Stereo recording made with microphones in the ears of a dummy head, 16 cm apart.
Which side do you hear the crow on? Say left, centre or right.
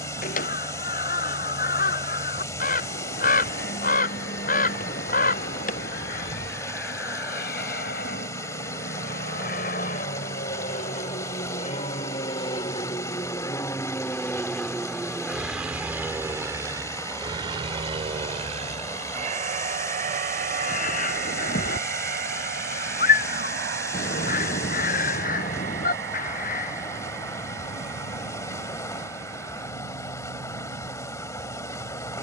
left.